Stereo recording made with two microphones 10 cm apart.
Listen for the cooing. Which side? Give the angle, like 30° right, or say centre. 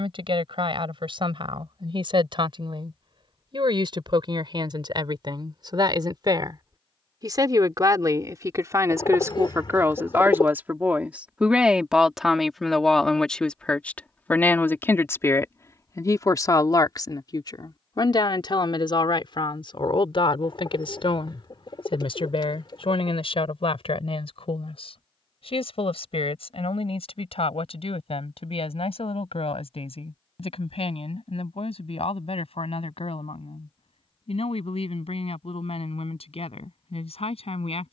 50° left.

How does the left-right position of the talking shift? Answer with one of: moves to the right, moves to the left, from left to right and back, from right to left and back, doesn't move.
moves to the left.